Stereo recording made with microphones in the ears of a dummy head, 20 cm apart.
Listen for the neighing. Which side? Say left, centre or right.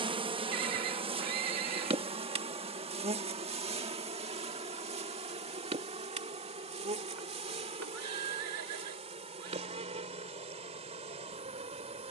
right.